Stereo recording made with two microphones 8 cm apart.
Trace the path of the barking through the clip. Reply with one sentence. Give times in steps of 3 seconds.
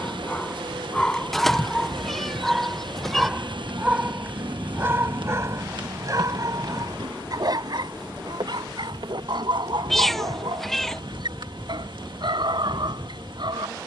In this clip you hear the barking in the centre from 0 s and on the right from 3 s.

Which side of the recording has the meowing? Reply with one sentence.
You can hear the meowing in the centre.